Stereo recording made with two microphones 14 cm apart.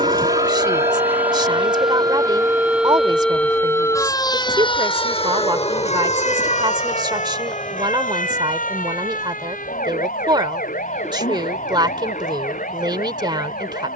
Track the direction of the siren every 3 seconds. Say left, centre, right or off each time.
right, left, left, left, left.